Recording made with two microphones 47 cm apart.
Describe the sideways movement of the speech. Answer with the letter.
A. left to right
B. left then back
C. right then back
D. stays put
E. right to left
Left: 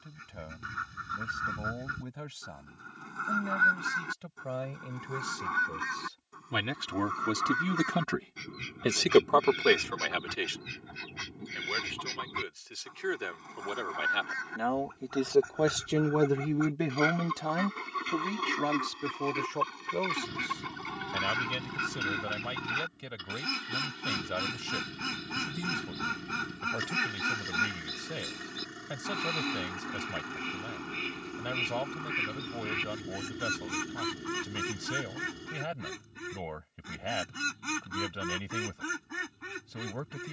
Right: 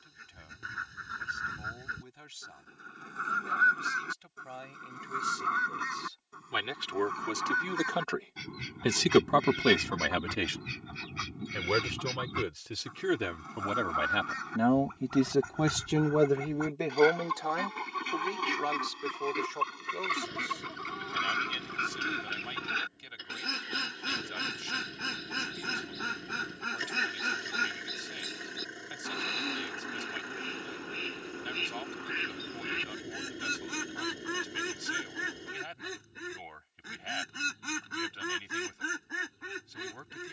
C.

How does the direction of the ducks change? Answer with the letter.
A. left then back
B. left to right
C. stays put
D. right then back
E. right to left
D.